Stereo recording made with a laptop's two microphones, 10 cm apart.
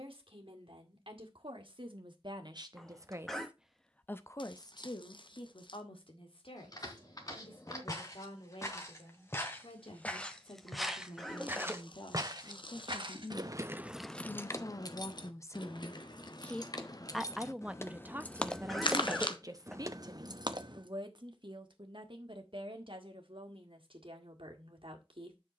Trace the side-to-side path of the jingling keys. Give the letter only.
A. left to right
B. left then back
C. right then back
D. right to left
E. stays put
B.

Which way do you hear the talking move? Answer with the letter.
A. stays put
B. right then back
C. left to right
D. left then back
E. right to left
D.